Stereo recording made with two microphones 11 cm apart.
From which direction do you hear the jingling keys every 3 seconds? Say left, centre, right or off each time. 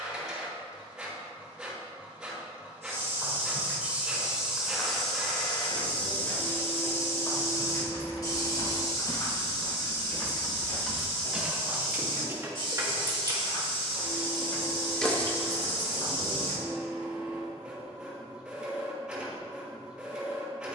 off, off, left, centre, right, left, off.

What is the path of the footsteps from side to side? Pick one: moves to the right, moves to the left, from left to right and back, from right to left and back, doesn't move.
moves to the left.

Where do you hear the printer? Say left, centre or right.
centre.